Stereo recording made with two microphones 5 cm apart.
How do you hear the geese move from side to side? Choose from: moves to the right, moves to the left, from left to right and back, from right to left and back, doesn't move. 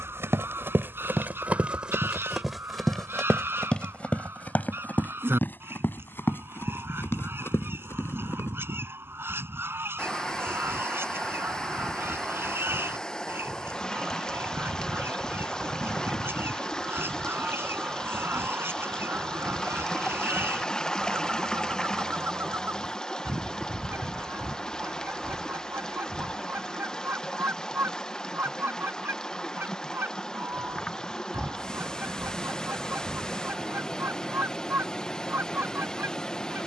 doesn't move.